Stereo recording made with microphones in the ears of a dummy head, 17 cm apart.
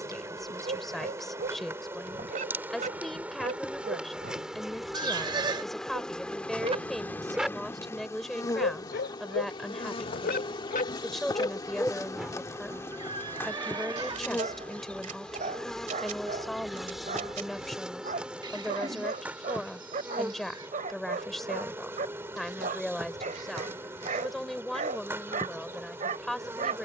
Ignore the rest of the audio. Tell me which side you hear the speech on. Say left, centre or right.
centre.